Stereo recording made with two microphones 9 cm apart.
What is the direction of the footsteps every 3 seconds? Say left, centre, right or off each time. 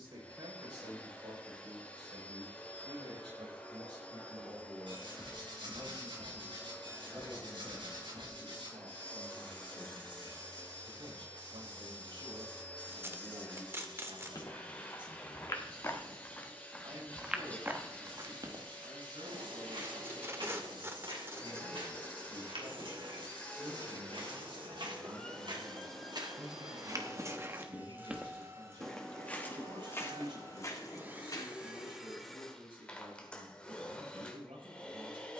off, off, off, off, left, centre, right, right, right, centre, left, off.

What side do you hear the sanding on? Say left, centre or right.
right.